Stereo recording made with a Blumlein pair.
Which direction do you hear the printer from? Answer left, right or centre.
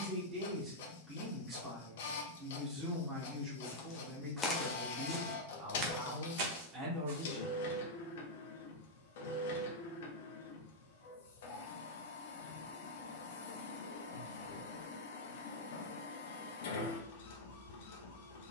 left.